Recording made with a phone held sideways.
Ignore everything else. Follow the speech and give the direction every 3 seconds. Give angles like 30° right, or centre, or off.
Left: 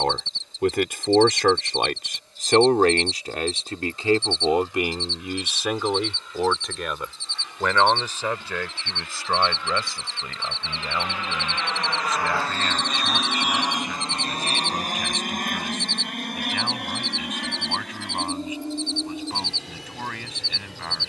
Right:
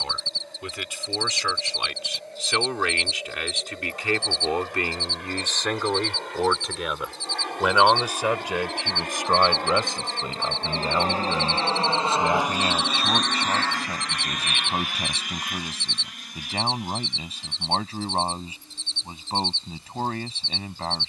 50° left, 20° left, 10° right, 20° right, 30° right, 30° right, 30° right.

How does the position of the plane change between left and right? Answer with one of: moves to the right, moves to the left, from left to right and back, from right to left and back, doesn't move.
moves to the left.